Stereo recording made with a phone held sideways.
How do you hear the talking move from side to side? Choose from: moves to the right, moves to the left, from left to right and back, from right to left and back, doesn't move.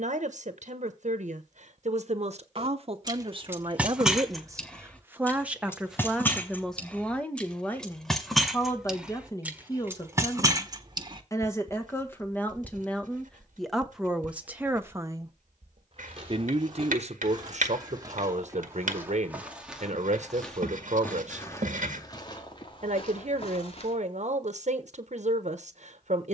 from right to left and back.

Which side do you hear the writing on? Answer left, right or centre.
right.